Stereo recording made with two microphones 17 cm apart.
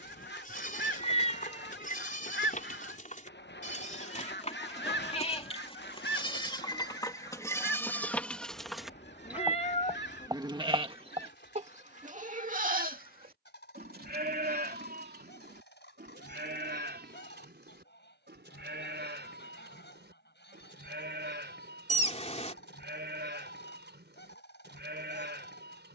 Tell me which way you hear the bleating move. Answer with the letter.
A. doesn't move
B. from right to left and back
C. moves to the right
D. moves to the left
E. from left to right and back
C.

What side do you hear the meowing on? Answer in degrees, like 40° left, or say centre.
40° left.